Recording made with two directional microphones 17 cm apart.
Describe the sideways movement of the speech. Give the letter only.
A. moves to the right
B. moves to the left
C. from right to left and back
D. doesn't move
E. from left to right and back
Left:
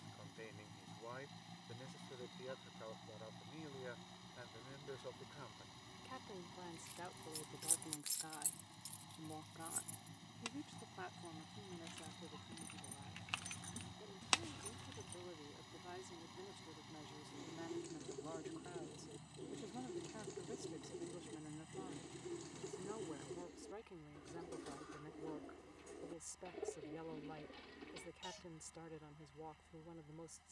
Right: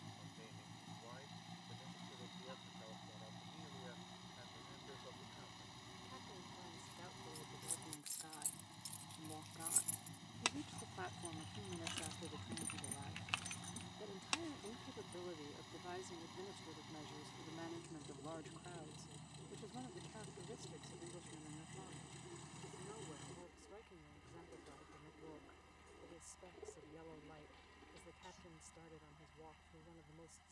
E.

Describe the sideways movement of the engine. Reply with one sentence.
In this clip you hear the engine stay put.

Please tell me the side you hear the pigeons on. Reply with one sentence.
In this clip you hear the pigeons on the left.